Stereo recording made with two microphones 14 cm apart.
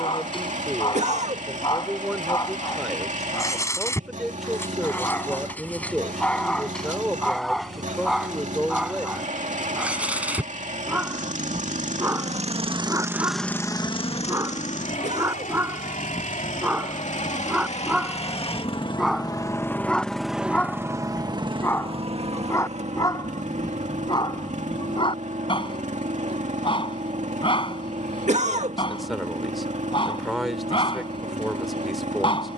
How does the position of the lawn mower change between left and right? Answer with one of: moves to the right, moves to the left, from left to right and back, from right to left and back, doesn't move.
from right to left and back.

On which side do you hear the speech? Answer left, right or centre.
centre.